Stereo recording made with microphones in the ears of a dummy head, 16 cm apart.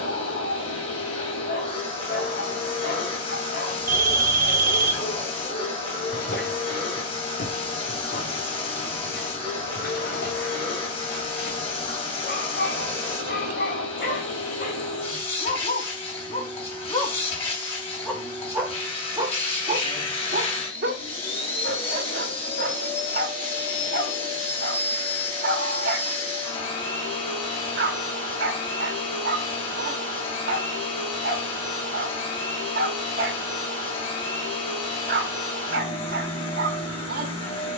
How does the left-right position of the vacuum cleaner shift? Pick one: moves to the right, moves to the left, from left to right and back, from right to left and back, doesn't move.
doesn't move.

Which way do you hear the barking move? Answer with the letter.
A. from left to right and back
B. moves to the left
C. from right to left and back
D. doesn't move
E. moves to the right
E.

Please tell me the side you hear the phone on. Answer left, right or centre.
right.